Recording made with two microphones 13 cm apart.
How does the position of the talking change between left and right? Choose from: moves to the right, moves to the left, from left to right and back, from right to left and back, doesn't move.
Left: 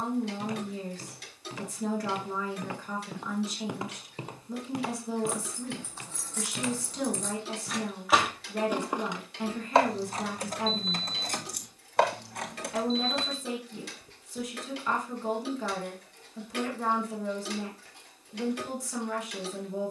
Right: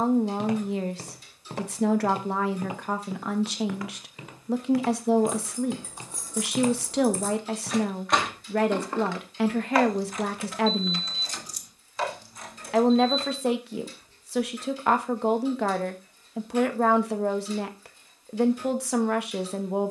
doesn't move.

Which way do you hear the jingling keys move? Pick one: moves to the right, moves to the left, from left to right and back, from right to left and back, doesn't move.
moves to the left.